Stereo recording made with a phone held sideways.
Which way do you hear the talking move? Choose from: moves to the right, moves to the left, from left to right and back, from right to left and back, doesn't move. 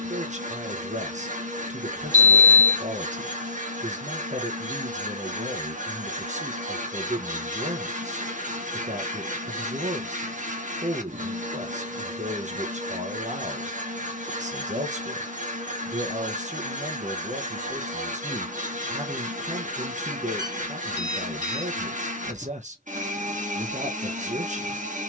doesn't move.